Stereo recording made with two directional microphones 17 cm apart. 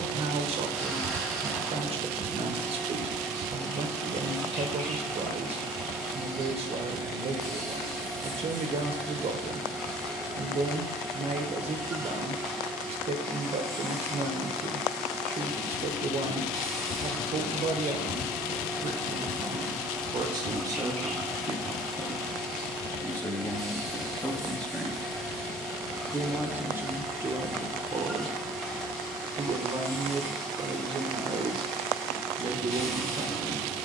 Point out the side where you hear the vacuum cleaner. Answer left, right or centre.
centre.